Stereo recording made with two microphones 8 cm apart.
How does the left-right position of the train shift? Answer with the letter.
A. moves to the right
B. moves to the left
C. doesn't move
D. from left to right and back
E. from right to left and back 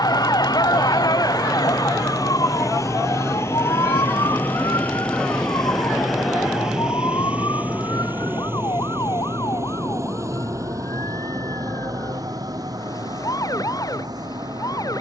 A.